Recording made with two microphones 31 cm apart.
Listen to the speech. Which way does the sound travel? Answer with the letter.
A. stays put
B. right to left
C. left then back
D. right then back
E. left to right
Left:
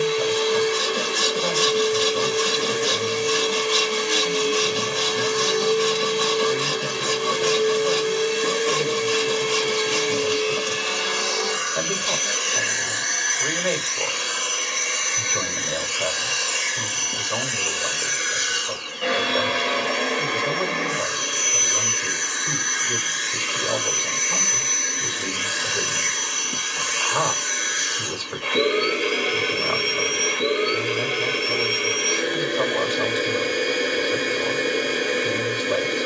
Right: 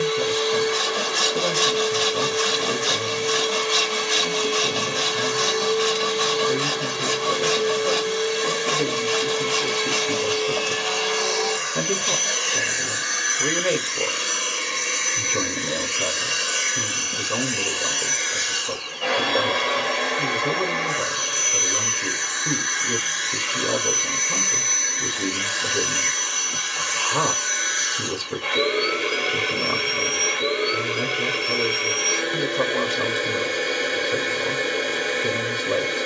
A.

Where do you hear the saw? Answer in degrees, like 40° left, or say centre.
50° left.